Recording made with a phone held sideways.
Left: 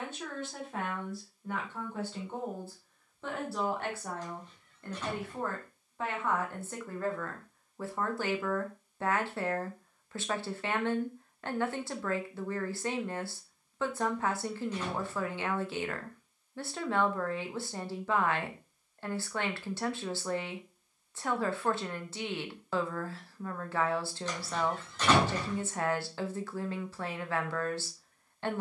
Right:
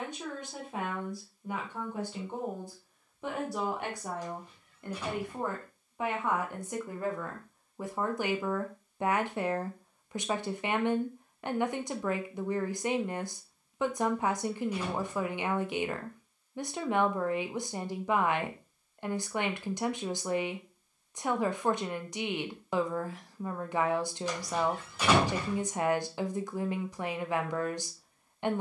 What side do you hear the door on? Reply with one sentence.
In this clip you hear the door in the centre.